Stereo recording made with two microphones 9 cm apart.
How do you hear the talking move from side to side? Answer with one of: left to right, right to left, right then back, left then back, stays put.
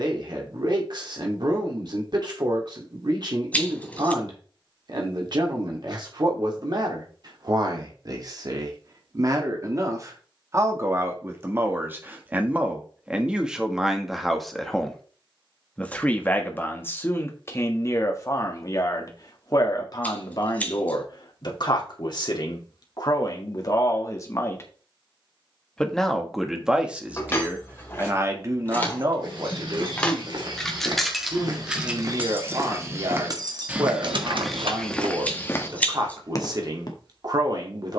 left then back.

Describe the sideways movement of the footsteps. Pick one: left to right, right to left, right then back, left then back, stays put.
right to left.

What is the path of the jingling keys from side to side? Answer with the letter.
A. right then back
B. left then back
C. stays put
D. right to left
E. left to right
E.